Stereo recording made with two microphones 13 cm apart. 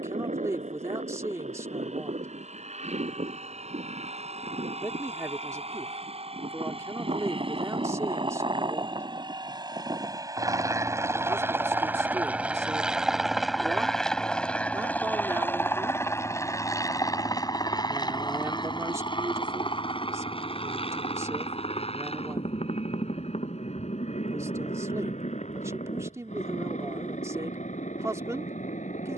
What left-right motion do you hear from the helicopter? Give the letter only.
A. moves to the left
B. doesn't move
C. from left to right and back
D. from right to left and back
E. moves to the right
A.